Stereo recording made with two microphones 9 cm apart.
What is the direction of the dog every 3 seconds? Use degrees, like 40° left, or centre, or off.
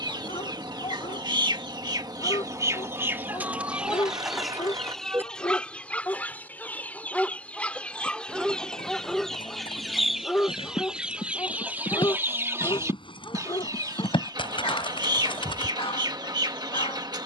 70° left, 40° left, centre, 20° left, 60° left, 70° left.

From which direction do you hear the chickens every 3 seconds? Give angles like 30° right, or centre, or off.
50° right, centre, 10° left, 10° right, 40° right, 50° right.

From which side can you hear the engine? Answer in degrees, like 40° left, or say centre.
50° right.